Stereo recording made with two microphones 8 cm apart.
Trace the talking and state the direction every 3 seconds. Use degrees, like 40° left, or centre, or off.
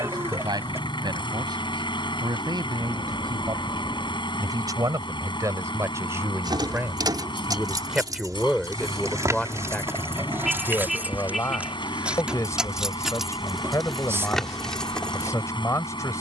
60° right, 50° right, 10° right, 30° left, 40° left, 40° left.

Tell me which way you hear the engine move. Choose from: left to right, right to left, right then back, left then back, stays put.
stays put.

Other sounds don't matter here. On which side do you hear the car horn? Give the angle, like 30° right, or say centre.
centre.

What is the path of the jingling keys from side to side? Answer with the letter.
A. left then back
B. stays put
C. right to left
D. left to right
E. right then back
C.